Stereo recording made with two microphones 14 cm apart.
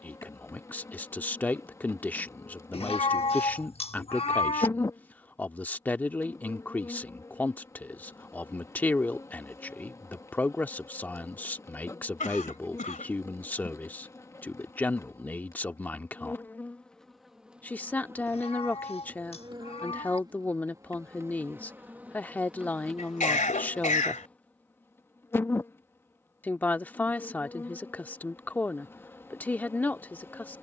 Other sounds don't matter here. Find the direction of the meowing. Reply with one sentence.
In this clip you hear the meowing on the left.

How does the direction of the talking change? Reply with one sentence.
You can hear the talking stay in one place.